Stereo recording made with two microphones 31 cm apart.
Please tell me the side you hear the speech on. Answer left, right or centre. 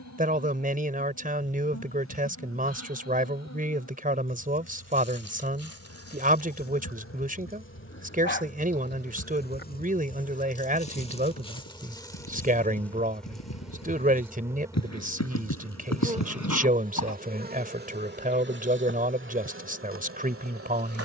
right.